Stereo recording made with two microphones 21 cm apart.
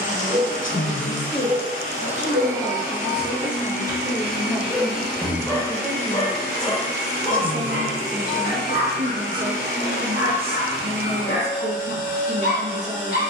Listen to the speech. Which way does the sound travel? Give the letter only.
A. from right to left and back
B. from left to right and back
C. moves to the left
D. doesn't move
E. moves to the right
E.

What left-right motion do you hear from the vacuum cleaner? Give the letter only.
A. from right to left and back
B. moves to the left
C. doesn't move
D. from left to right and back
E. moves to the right
C.